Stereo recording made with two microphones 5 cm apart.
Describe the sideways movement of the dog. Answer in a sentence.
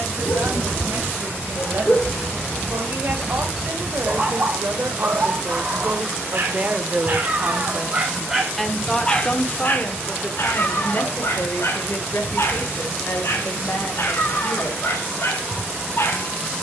You can hear the dog move from left to right and back again.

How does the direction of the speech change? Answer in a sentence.
You can hear the speech go from the right side to the left.